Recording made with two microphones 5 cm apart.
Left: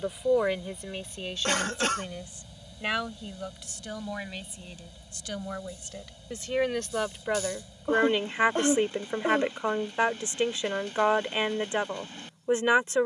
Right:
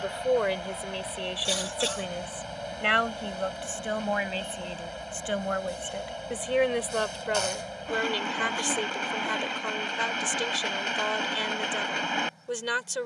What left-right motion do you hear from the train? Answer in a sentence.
You can hear the train stay in one place.